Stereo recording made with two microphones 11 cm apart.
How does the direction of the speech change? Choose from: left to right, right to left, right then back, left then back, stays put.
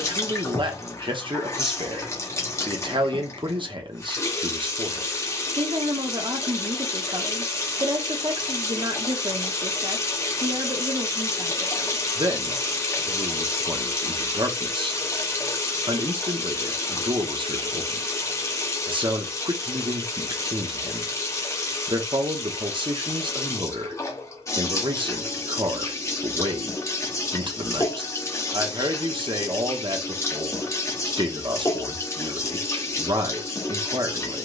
stays put.